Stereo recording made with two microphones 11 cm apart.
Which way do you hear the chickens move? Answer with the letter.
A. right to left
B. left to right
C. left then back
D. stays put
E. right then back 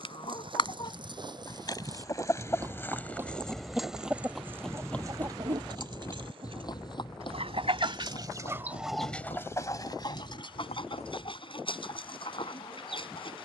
E.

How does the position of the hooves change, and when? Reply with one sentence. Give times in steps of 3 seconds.
In this clip you hear the hooves on the right from 0 s, in the centre from 3 s, on the left from 6 s and not at all from 12 s.